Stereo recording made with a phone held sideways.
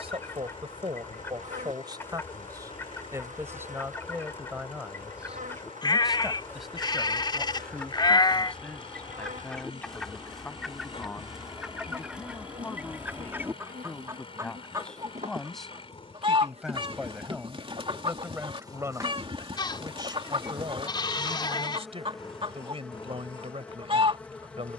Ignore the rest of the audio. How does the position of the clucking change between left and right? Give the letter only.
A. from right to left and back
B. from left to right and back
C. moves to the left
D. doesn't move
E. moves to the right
E.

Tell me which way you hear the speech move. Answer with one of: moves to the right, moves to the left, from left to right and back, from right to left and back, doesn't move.
from right to left and back.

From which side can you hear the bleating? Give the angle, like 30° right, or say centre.
30° left.